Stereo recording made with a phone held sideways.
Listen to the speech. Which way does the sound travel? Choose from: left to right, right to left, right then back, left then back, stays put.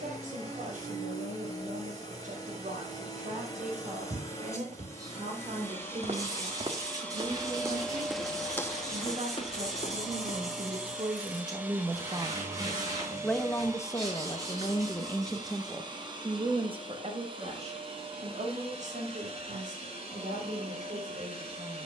left then back.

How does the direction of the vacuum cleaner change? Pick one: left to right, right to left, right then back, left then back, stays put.
left to right.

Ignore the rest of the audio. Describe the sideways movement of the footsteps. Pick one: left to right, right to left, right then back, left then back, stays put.
right to left.